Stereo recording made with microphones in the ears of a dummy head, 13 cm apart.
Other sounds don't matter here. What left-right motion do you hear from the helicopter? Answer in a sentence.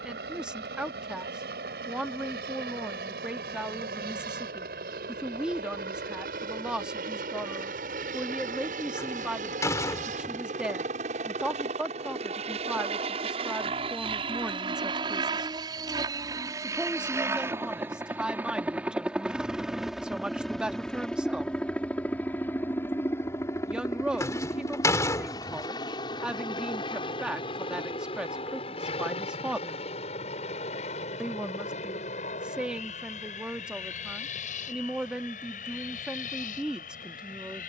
You can hear the helicopter move to the left.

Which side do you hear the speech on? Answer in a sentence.
In this clip you hear the speech in the centre.